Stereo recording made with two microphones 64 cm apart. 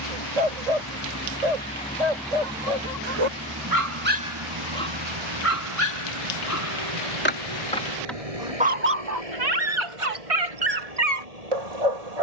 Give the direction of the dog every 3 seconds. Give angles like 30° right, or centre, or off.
80° right, centre, 10° left, 60° right.